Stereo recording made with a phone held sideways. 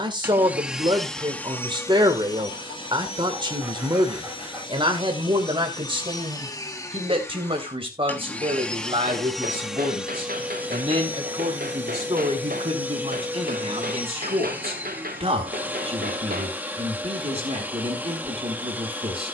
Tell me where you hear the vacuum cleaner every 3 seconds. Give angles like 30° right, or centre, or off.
10° left, 40° left, 20° left, 10° right, 10° right, 10° right, 10° right.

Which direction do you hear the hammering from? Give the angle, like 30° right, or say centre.
80° right.